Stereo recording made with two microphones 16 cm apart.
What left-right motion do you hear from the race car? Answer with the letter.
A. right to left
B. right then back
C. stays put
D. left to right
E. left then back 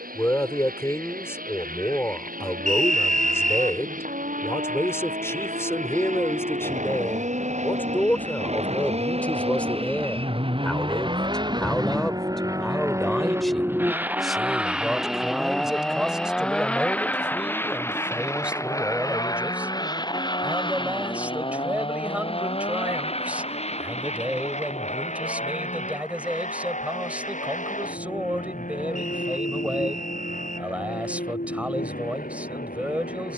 A.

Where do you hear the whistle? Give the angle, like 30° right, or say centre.
50° right.